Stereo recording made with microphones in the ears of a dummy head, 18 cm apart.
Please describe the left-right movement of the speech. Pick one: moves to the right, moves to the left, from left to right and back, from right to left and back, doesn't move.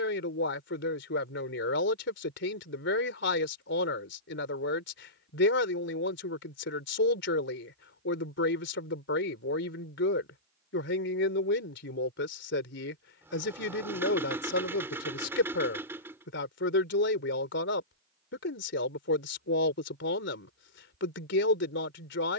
doesn't move.